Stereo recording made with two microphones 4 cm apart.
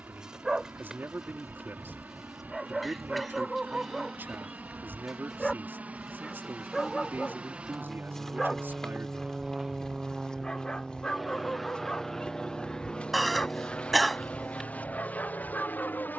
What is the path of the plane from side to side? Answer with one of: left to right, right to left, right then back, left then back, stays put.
right to left.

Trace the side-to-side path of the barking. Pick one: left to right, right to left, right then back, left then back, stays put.
right to left.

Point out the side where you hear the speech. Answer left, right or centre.
right.